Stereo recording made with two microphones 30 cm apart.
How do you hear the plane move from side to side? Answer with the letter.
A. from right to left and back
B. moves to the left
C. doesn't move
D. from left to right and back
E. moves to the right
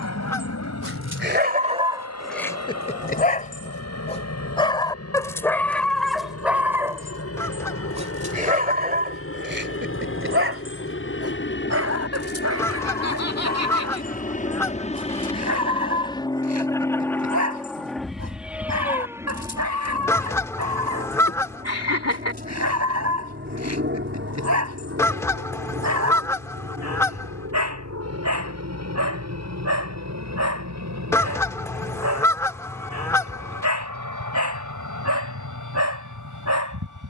E.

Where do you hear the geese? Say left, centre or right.
centre.